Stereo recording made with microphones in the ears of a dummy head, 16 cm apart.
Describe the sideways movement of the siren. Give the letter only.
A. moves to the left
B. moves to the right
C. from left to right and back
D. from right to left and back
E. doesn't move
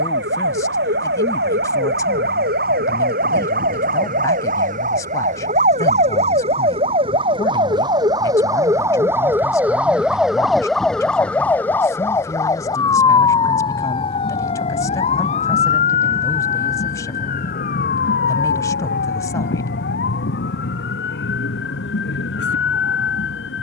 A.